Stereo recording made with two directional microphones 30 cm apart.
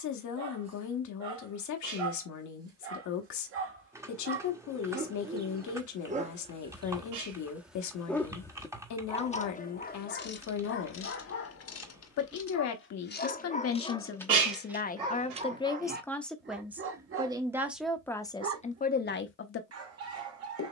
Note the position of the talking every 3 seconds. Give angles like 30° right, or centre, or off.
60° left, 60° left, 60° left, 60° left, 50° left, centre, 30° left.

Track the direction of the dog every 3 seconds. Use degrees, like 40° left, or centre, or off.
50° right, 30° right, 10° right, 40° left, 20° left, 30° right, 50° right.